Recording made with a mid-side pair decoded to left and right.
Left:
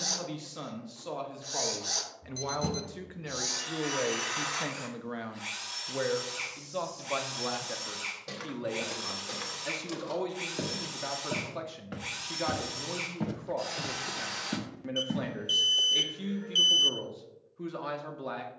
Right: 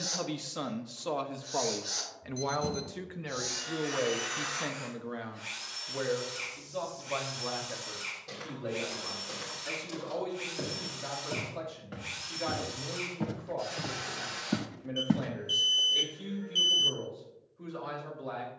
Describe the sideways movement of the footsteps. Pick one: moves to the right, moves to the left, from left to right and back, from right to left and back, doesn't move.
moves to the right.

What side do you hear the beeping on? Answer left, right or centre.
left.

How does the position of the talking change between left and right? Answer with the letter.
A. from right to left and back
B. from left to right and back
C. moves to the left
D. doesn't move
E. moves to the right
C.